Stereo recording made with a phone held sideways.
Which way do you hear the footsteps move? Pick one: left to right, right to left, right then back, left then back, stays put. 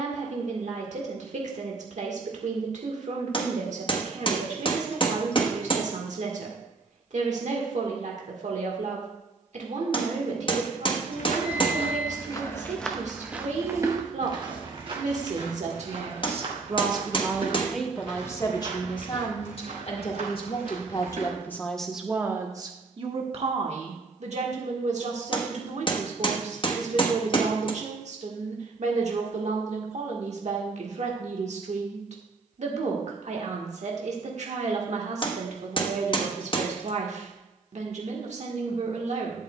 left to right.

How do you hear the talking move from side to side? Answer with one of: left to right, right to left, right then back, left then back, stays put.
left then back.